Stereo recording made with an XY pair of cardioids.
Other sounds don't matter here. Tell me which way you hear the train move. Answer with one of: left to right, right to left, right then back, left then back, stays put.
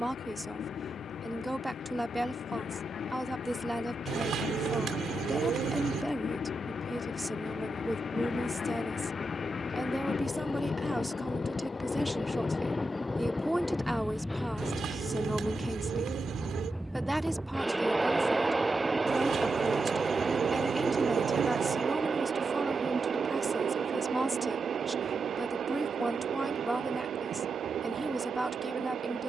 left to right.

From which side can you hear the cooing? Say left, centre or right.
right.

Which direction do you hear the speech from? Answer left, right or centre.
centre.